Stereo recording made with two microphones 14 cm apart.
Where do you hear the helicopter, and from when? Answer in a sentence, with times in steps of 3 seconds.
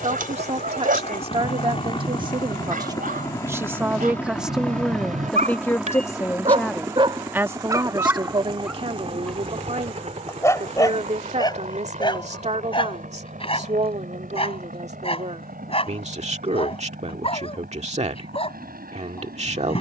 In this clip you hear the helicopter on the left from 0 s, in the centre from 3 s and on the right from 6 s.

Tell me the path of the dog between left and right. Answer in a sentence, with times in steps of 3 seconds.
In this clip you hear the dog on the right from 0 s and on the left from 9 s.